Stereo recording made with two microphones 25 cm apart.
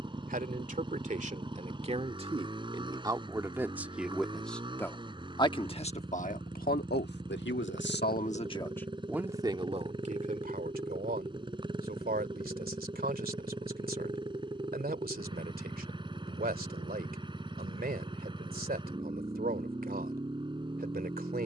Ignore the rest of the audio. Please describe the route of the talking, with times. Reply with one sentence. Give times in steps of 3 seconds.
In this clip you hear the talking on the right from 0 s, in the centre from 3 s, on the left from 6 s and on the right from 9 s.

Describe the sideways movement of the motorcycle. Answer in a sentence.
In this clip you hear the motorcycle stay in one place.